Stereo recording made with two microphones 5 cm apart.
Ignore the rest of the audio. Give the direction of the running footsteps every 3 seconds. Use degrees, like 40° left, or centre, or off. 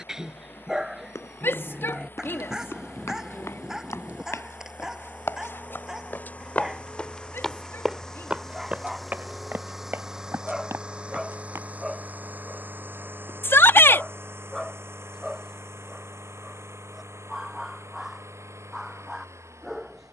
80° left, 60° left, 10° left, 50° right, off, off, off.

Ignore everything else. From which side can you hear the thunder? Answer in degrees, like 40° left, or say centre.
30° right.